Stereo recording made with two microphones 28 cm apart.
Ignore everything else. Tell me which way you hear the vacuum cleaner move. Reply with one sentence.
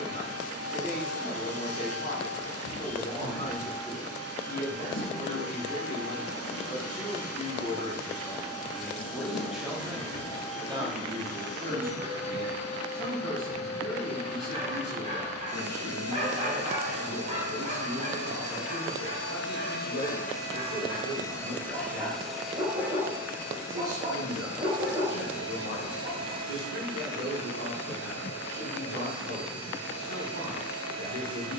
In this clip you hear the vacuum cleaner travel towards the right.